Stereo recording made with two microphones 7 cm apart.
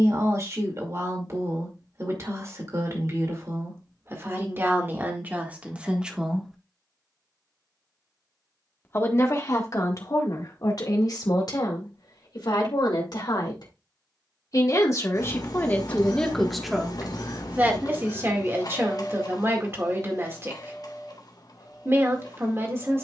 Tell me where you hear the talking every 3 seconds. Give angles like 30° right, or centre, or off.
40° right, 30° right, centre, 50° left, 60° left, 10° left, 30° right, 30° right.